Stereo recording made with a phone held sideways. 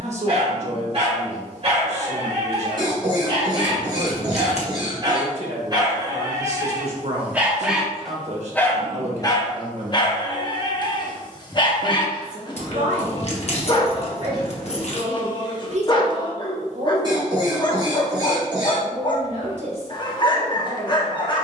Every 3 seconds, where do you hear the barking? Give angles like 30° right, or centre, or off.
50° right, 40° right, 10° right, 30° left, 40° left, 40° left, 40° left.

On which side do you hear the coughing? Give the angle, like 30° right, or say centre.
30° right.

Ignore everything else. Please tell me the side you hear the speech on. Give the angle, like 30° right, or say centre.
60° right.